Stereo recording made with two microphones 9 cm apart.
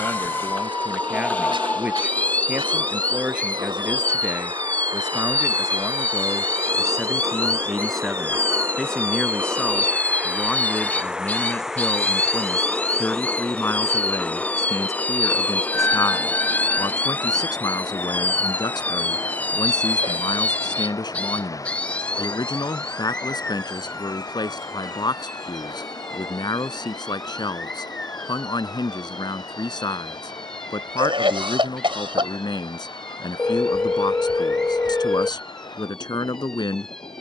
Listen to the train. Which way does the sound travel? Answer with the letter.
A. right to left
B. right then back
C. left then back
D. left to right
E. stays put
A.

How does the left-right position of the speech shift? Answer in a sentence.
In this clip you hear the speech move to the left.